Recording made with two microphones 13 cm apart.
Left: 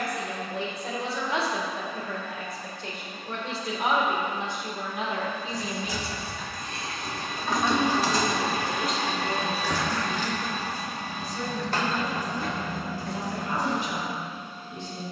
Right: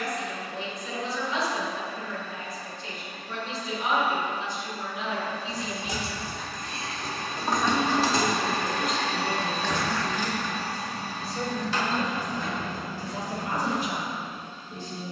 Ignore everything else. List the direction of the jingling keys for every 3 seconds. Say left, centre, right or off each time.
off, right, right, left, left.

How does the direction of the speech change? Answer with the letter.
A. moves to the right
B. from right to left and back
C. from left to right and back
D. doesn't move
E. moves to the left
A.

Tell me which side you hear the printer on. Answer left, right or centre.
centre.